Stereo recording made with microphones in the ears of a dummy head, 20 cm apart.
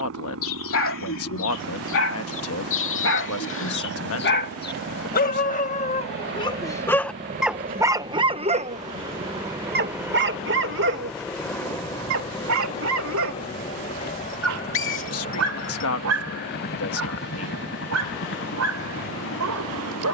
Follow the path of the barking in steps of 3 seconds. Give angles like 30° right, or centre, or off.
70° left, 50° left, centre, 60° right, 70° right, 80° right, 80° right.